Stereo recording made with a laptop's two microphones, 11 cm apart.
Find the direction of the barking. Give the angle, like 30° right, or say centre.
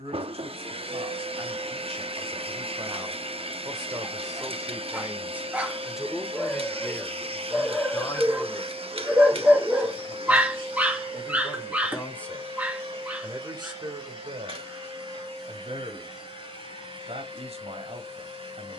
10° right.